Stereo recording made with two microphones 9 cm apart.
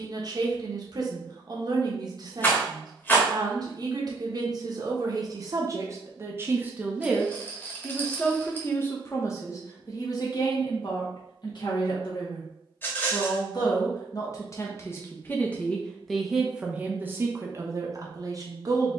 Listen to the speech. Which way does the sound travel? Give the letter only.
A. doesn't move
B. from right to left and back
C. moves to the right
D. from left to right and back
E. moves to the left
B.